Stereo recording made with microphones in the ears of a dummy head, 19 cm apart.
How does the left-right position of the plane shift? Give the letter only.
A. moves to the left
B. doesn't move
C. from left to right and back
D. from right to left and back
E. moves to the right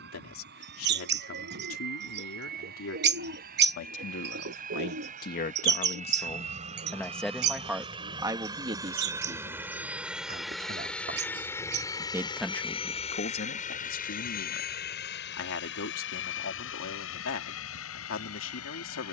A.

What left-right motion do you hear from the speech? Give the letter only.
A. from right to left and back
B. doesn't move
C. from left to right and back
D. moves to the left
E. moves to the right
C.